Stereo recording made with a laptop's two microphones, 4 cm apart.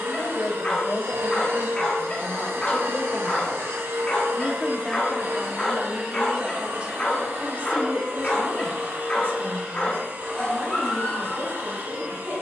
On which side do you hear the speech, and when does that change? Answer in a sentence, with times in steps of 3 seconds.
You can hear the speech on the left from 0 s, in the centre from 3 s and on the right from 6 s.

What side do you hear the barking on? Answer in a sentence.
In this clip you hear the barking on the left.